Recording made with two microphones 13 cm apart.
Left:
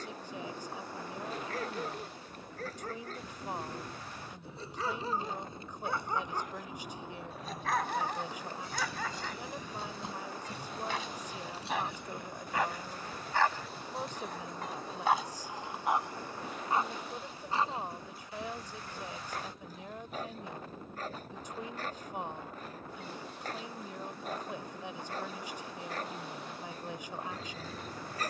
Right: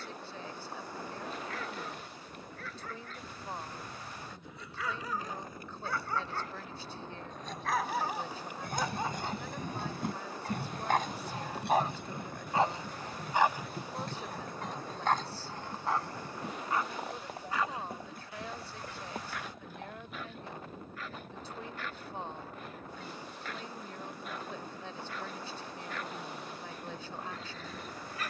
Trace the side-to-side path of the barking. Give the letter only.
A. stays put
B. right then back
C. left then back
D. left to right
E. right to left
B.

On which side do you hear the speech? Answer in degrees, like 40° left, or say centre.
10° left.